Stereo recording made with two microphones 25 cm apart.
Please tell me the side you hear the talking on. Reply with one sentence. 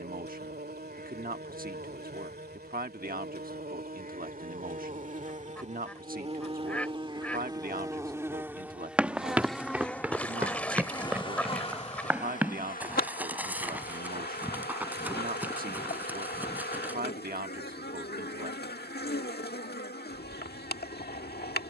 You can hear the talking on the right.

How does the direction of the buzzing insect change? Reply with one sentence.
In this clip you hear the buzzing insect travel towards the left.